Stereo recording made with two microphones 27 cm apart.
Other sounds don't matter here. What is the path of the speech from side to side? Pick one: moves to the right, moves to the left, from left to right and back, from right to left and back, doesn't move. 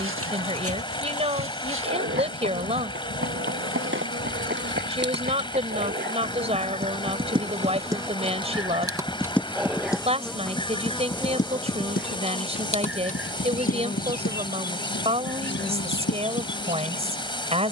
doesn't move.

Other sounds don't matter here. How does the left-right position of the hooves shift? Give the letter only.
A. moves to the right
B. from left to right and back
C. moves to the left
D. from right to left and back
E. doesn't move
C.